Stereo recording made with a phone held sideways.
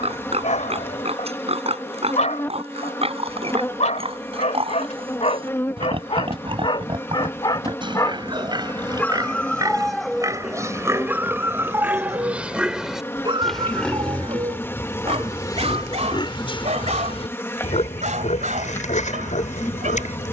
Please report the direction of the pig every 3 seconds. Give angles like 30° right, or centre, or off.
50° right, 40° right, 40° right, 20° right, centre, 30° left, 60° left.